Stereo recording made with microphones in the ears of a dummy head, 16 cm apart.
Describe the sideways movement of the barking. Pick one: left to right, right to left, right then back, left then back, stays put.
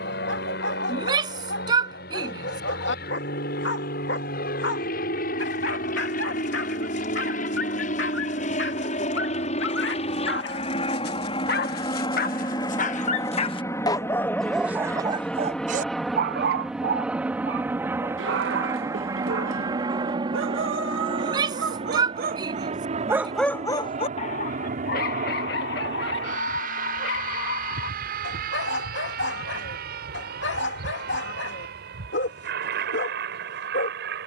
right then back.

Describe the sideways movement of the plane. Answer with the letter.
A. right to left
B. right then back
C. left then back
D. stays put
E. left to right
E.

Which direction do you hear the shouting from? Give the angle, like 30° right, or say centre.
20° right.